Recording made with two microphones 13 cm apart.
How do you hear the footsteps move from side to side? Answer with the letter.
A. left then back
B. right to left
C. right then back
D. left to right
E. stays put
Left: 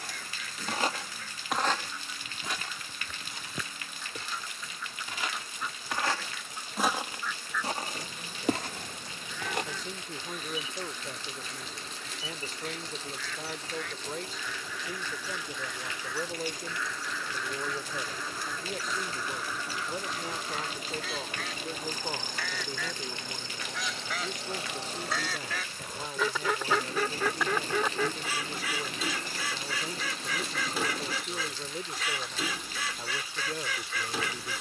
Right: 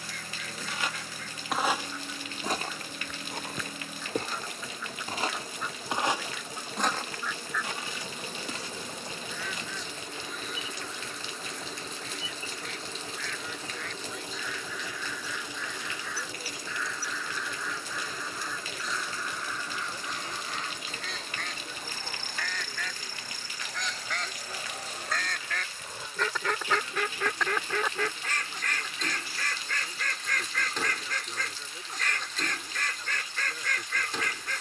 C.